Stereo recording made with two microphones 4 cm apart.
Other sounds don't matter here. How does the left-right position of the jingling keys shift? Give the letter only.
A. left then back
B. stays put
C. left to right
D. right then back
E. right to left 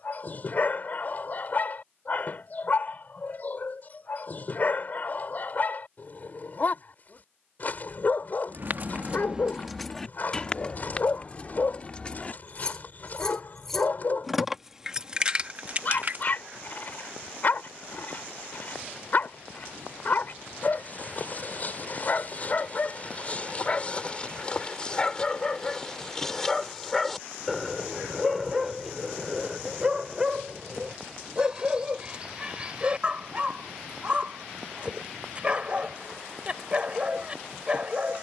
A.